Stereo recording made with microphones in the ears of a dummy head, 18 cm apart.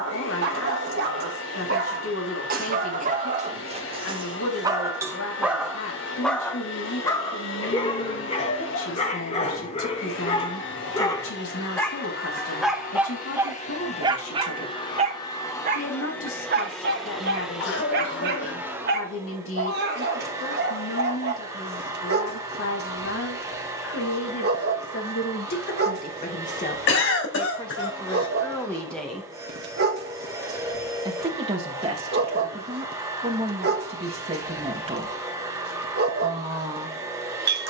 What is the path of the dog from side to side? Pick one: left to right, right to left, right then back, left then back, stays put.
left then back.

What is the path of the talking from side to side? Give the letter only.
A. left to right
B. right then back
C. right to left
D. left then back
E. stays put
A.